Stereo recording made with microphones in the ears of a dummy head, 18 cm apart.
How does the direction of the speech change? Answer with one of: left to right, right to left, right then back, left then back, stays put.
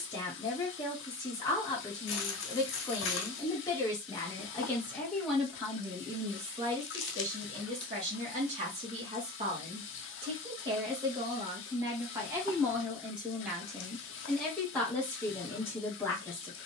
right then back.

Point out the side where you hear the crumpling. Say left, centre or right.
left.